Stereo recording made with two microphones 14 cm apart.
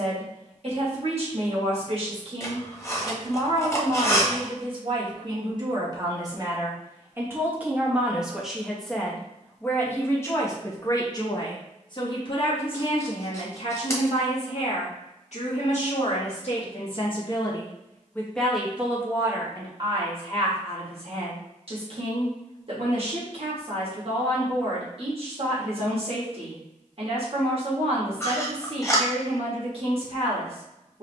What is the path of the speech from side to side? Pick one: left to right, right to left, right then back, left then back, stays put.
left then back.